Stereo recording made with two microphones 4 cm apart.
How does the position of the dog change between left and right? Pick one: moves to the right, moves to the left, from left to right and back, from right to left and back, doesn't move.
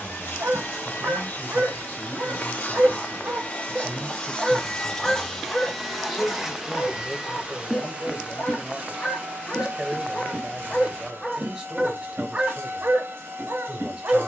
from right to left and back.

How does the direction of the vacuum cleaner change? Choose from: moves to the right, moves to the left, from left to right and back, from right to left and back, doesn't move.
moves to the right.